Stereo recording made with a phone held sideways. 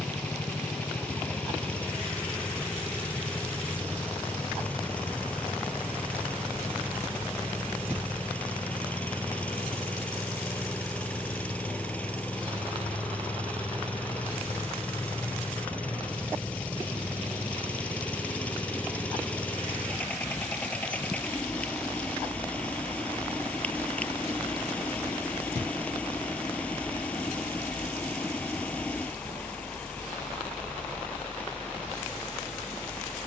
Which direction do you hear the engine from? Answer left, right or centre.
centre.